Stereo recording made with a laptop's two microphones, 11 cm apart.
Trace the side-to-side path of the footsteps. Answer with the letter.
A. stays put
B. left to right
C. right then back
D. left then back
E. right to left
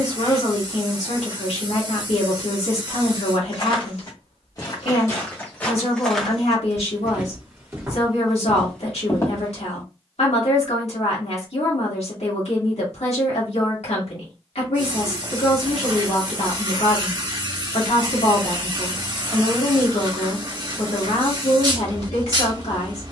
C.